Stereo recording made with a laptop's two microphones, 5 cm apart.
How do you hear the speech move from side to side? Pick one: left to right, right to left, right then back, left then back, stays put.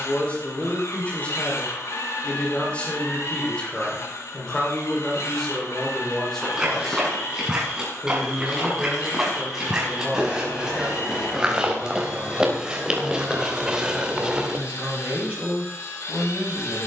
left to right.